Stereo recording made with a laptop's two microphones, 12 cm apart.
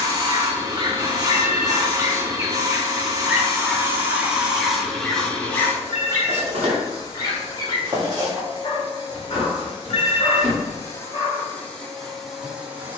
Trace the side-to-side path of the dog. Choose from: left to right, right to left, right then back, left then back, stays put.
right to left.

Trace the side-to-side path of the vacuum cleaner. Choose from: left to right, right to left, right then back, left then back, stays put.
left then back.